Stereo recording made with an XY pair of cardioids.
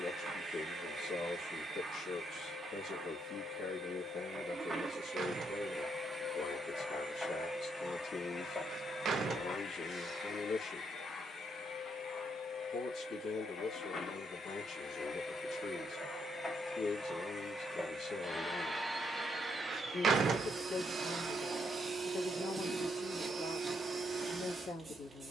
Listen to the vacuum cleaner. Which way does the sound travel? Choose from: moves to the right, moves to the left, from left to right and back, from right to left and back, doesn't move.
from right to left and back.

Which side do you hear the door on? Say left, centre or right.
right.